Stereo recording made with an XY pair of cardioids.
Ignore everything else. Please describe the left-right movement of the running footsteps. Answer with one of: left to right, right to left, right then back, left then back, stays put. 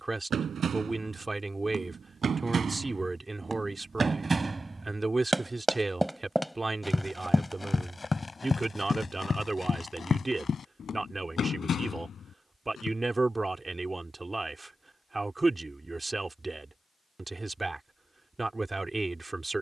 right to left.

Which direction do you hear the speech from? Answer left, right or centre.
right.